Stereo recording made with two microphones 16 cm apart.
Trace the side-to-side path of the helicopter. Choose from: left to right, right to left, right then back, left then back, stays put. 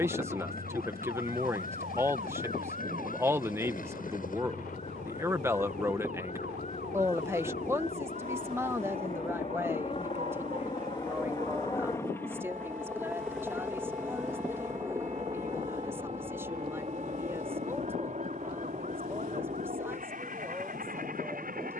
left to right.